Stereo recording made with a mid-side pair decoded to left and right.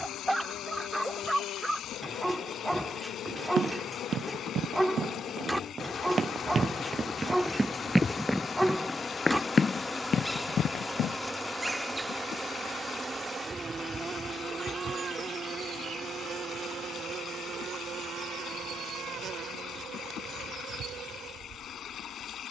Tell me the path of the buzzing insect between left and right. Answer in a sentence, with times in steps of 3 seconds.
You can hear the buzzing insect on the left from 0 s, in the centre from 9 s and on the right from 12 s.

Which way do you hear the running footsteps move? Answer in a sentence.
You can hear the running footsteps move to the left.